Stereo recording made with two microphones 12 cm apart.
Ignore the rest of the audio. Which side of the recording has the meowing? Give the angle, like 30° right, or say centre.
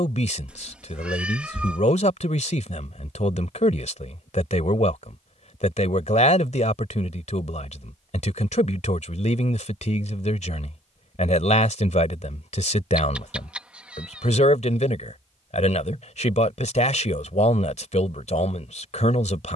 10° right.